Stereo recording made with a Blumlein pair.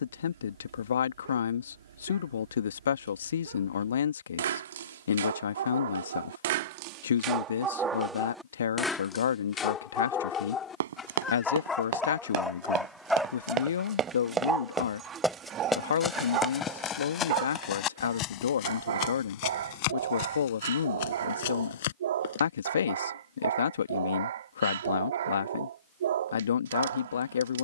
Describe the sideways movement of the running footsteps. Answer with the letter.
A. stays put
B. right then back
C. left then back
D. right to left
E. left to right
D.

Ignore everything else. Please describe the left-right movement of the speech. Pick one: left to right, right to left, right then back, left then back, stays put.
stays put.